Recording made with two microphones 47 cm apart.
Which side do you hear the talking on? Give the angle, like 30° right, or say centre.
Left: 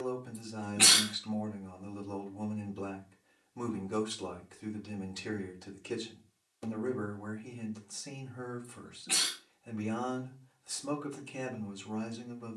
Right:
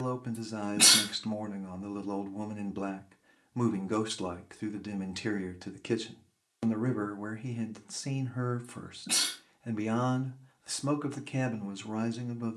80° right.